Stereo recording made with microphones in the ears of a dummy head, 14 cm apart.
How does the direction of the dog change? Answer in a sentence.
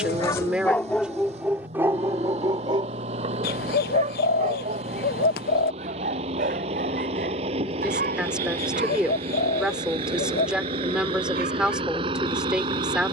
You can hear the dog move to the right.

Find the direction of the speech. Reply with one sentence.
You can hear the speech in the centre.